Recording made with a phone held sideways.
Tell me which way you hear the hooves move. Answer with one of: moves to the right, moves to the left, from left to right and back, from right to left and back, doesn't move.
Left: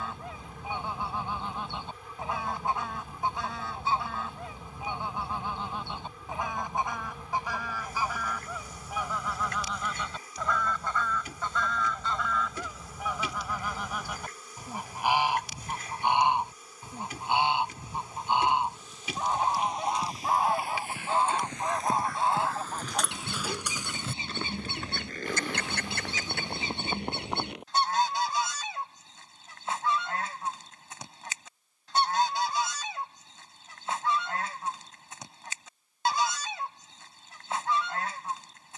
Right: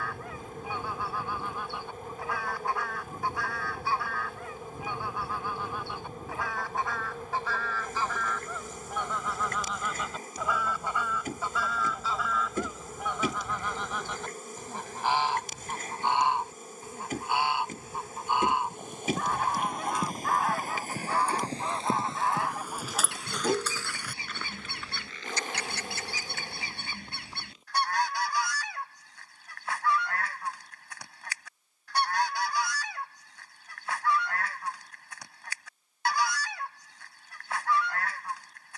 moves to the left.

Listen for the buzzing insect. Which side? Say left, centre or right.
right.